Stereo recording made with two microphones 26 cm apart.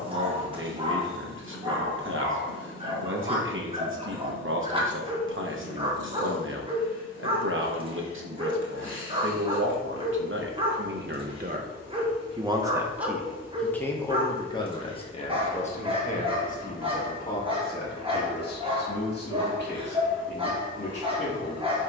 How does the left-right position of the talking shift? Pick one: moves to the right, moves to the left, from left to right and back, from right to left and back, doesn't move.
moves to the left.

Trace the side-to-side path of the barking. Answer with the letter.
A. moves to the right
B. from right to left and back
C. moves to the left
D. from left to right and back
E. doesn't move
E.